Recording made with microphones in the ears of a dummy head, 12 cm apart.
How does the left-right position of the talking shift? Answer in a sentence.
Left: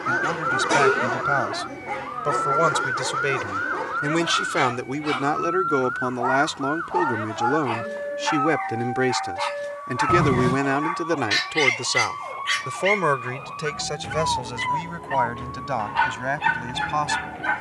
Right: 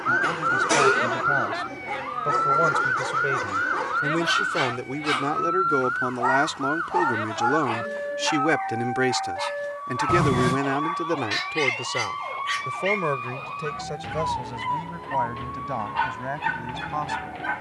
You can hear the talking go right and come back.